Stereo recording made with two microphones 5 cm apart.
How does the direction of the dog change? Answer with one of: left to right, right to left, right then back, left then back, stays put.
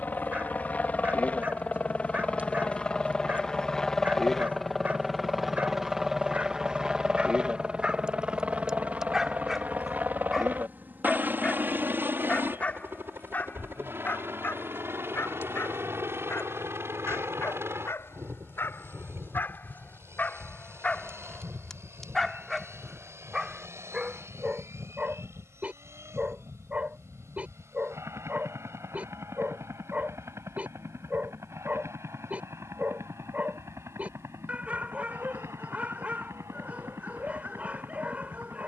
left then back.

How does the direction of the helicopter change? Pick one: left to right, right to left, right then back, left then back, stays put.
left to right.